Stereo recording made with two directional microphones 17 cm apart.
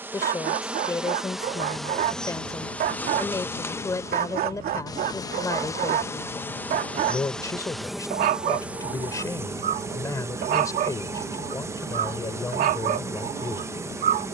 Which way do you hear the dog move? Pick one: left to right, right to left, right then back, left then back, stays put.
stays put.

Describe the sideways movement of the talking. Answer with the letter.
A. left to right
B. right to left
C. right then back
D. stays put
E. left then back
D.